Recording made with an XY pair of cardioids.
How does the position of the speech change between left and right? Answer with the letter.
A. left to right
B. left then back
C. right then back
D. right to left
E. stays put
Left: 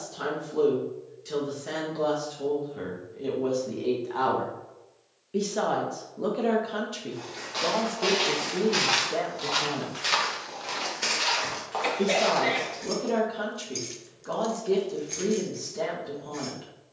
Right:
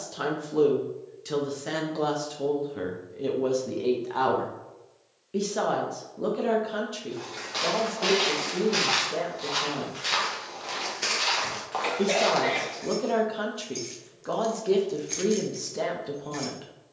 B.